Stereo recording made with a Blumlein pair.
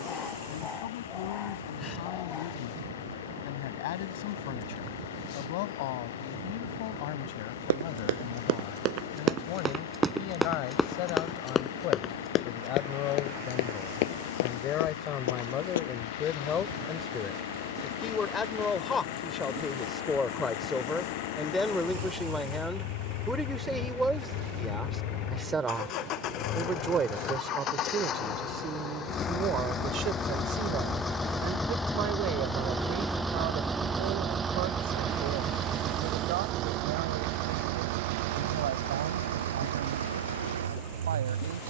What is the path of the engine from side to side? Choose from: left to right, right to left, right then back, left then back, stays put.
left to right.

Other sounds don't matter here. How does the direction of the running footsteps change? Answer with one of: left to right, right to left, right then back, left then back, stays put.
right to left.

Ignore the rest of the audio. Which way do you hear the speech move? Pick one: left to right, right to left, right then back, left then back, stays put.
left to right.